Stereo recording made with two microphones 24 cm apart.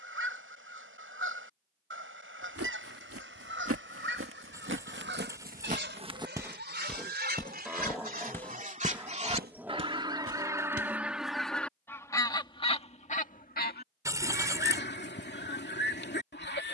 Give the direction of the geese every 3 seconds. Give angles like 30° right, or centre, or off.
60° right, 50° right, 40° right, 10° right, 30° left, 50° left.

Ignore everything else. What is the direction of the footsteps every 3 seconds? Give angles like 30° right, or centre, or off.
80° right, 50° right, centre, 50° right, off, off.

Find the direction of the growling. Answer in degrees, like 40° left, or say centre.
10° right.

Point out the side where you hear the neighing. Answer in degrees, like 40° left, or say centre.
10° right.